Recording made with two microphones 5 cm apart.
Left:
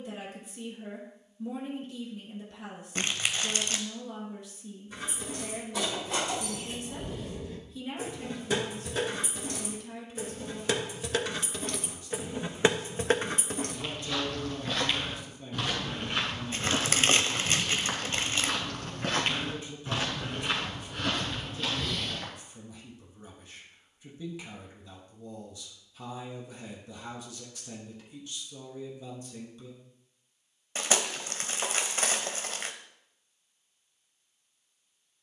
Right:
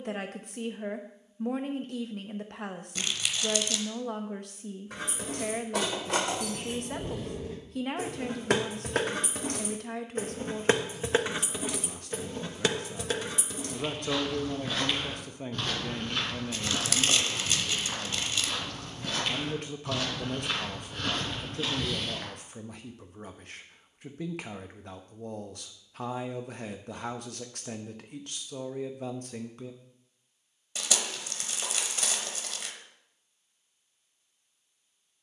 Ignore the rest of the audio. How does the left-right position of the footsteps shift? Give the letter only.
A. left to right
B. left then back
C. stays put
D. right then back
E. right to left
B.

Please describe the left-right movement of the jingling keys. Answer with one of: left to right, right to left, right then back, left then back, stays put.
right to left.